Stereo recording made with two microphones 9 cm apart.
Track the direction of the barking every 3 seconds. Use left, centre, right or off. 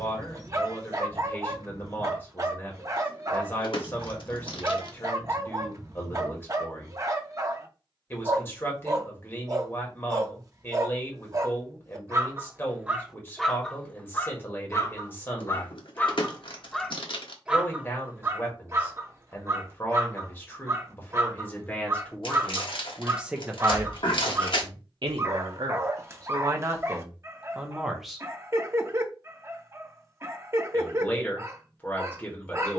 right, right, right, right, centre, centre, right, right, right, right, right.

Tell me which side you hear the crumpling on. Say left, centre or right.
left.